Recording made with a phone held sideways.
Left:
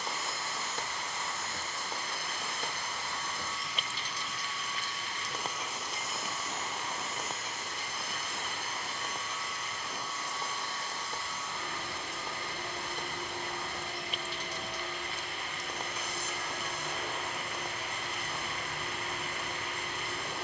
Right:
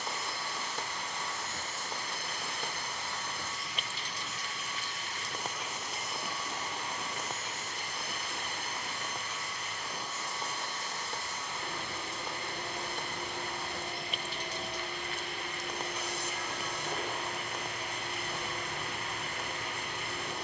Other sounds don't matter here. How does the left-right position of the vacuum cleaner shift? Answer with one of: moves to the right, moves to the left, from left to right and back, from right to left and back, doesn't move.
doesn't move.